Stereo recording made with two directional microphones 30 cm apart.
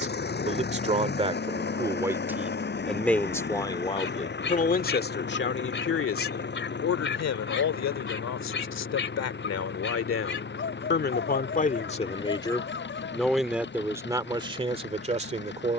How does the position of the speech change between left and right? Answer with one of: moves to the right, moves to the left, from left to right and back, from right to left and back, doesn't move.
from right to left and back.